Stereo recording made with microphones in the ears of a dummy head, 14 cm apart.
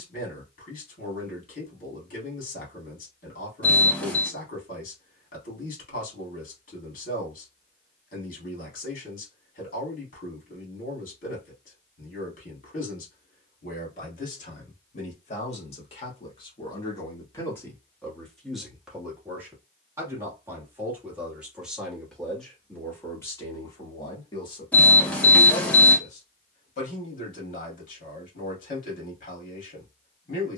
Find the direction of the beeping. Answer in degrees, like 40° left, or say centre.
10° left.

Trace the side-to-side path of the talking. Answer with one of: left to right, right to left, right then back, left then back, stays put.
right then back.